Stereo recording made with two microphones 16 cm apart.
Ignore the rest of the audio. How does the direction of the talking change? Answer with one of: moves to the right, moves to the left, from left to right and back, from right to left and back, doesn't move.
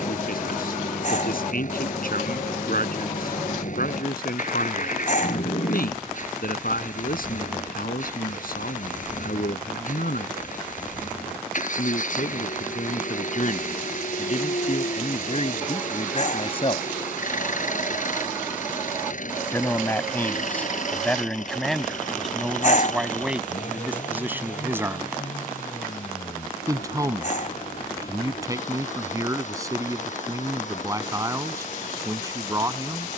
moves to the right.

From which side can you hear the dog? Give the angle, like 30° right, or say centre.
60° left.